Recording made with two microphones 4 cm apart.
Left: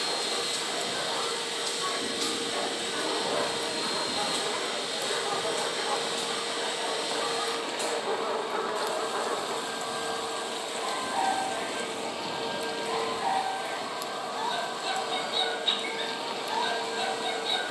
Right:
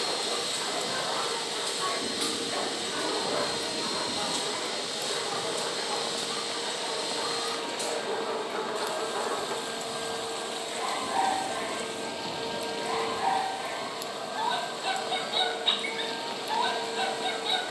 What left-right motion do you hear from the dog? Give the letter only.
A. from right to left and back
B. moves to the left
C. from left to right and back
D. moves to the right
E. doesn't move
A.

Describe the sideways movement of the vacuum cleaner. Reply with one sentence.
You can hear the vacuum cleaner stay put.